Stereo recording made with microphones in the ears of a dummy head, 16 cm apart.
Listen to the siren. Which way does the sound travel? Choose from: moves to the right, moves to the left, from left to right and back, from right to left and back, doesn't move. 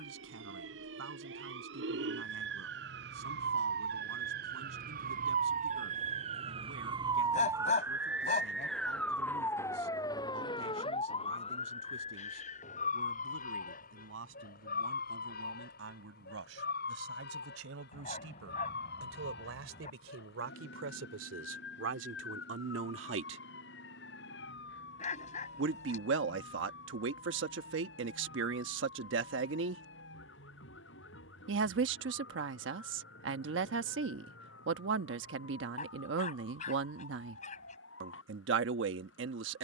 moves to the left.